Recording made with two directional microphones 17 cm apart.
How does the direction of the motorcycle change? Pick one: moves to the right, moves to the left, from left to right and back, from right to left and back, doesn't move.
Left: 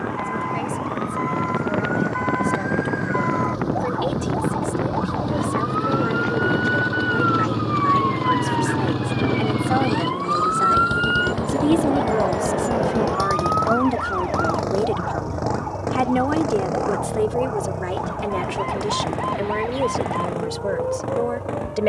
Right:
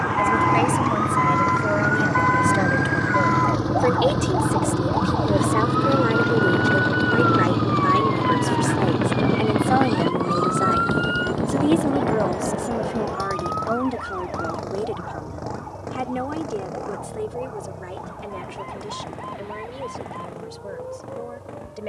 moves to the left.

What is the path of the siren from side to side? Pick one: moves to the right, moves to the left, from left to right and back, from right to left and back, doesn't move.
moves to the left.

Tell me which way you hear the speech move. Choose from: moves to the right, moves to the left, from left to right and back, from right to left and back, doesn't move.
moves to the left.